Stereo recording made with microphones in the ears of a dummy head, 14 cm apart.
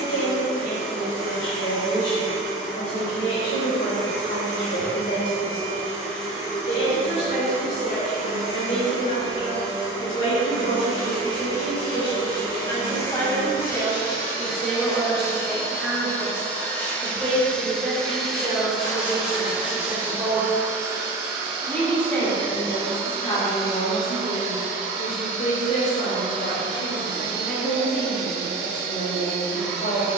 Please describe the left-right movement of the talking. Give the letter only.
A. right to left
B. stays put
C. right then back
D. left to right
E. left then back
C.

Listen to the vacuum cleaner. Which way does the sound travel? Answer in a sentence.
In this clip you hear the vacuum cleaner go from the left side to the right.